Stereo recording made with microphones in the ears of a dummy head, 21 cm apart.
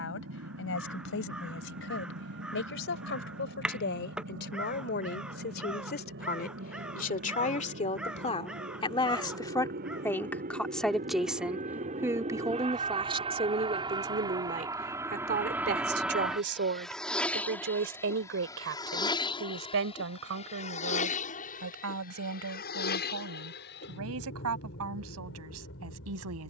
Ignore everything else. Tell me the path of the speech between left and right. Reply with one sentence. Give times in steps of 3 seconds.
You can hear the speech on the left from 0 s, in the centre from 9 s and on the right from 12 s.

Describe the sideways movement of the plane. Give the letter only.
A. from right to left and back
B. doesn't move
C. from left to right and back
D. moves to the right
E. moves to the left
E.